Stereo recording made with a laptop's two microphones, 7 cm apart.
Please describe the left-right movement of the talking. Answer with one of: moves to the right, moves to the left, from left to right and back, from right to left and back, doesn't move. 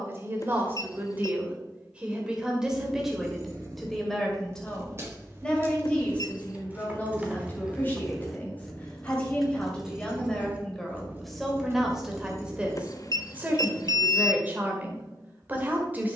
from right to left and back.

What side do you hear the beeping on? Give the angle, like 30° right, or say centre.
50° left.